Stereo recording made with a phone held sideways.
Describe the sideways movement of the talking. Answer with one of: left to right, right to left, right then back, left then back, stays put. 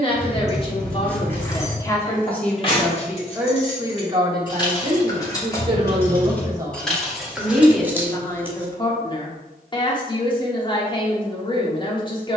right then back.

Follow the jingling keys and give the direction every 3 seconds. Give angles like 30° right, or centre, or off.
10° left, 30° left, centre, off.